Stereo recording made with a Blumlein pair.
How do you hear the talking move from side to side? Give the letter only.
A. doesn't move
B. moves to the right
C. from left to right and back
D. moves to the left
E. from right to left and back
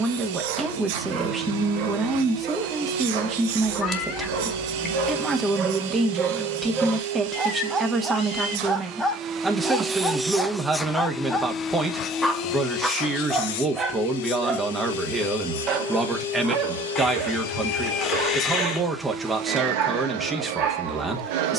A.